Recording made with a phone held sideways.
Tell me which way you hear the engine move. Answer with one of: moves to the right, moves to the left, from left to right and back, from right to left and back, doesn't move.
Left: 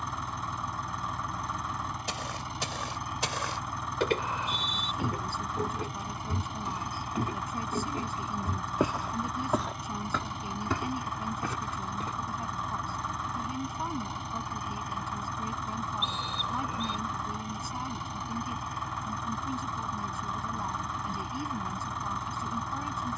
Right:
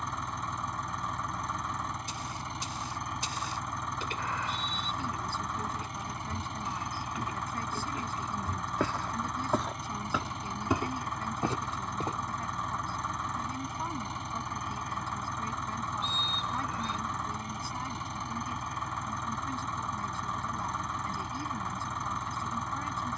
doesn't move.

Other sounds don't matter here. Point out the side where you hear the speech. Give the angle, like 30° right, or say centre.
10° left.